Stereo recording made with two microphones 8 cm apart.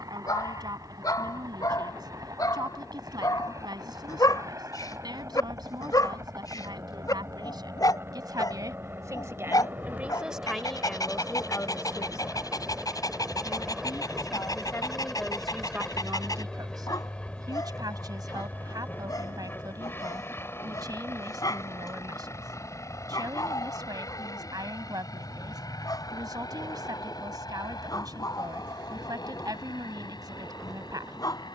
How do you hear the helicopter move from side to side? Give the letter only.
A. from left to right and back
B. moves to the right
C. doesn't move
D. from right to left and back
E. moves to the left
E.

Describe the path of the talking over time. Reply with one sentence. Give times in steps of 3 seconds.
You can hear the talking on the right from 0 s, in the centre from 9 s, on the left from 12 s and on the right from 15 s.